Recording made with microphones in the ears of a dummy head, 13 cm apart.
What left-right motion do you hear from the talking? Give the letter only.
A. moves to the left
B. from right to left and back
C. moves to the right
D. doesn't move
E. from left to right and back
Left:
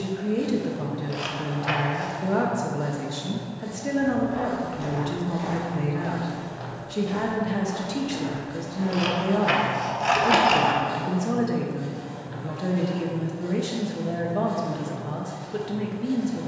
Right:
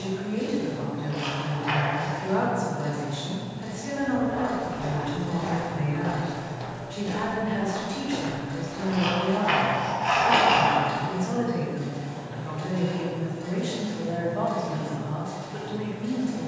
D.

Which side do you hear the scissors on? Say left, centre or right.
left.